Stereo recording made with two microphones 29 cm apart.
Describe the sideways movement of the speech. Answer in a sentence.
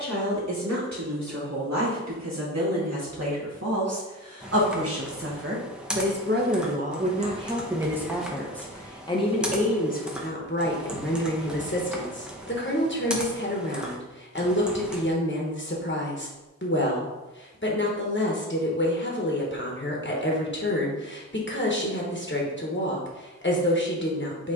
In this clip you hear the speech move from right to left.